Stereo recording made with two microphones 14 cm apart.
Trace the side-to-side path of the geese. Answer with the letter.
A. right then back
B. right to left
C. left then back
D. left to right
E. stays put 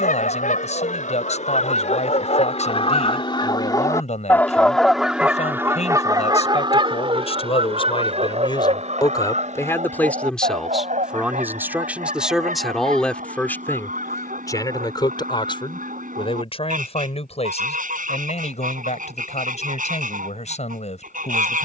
D.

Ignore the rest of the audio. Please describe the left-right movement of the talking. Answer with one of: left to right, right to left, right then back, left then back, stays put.
right then back.